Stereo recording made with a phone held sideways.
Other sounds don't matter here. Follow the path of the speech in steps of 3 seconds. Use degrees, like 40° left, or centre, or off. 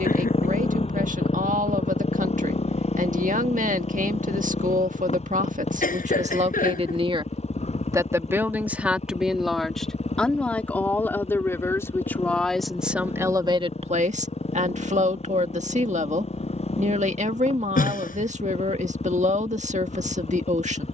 50° right, 50° right, 30° right, 10° left, 20° right, 50° right, 50° right.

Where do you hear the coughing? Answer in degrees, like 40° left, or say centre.
60° left.